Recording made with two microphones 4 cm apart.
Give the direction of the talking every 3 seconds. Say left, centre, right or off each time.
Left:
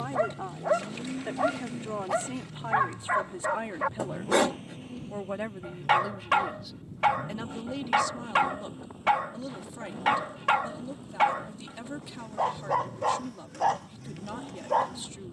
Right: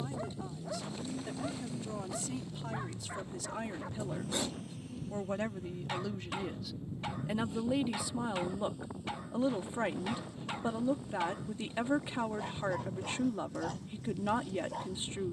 left, left, centre, right, right.